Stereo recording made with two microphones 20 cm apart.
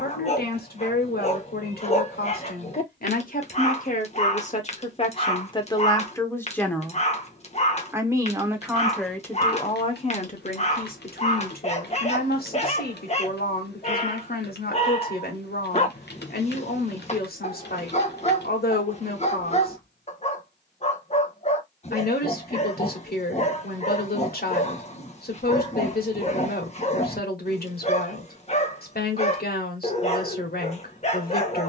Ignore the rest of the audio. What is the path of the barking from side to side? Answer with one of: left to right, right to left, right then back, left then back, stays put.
stays put.